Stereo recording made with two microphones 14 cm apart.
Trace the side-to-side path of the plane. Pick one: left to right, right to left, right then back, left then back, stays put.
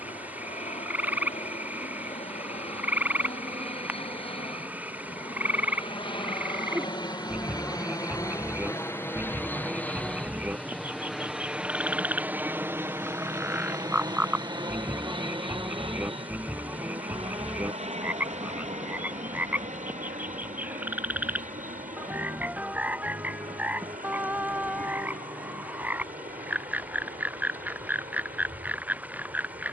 left to right.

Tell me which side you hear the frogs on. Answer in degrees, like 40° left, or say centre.
10° right.